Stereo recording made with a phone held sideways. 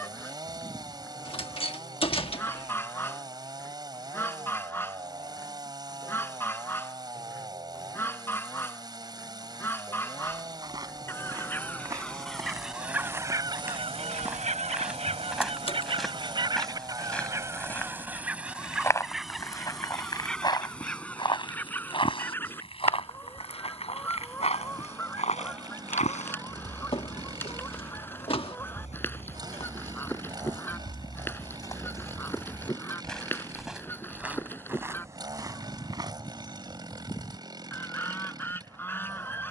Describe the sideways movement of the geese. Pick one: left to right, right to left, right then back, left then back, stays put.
right then back.